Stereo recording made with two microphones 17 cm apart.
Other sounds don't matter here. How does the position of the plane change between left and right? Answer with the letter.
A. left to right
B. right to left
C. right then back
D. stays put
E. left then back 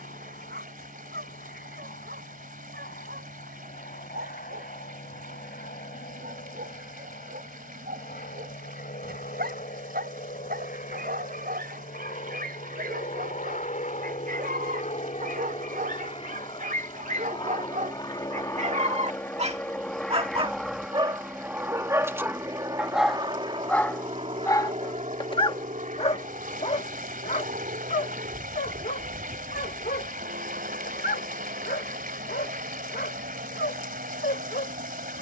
A.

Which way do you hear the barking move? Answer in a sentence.
You can hear the barking go from the right side to the left.